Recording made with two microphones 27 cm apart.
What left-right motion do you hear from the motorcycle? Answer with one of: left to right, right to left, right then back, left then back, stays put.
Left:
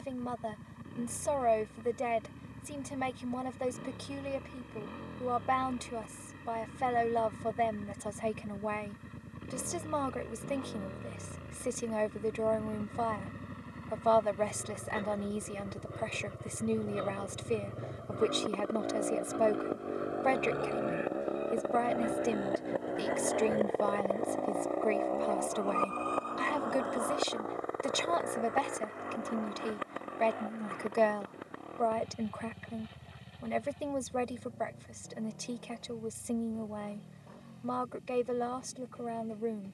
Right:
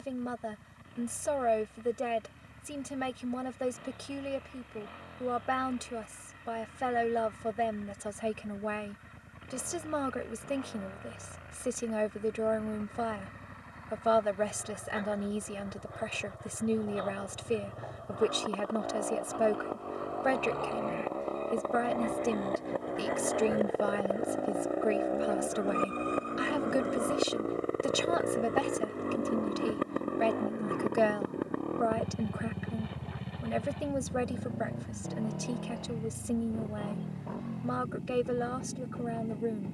left to right.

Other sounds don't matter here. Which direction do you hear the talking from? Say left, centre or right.
centre.